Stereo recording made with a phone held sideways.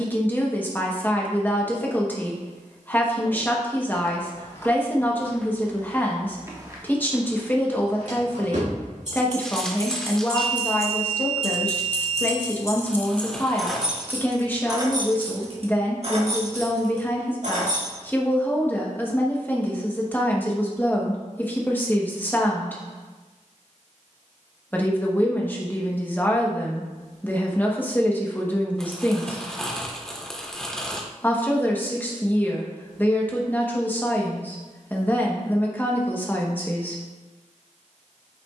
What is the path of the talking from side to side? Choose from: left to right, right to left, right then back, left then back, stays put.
stays put.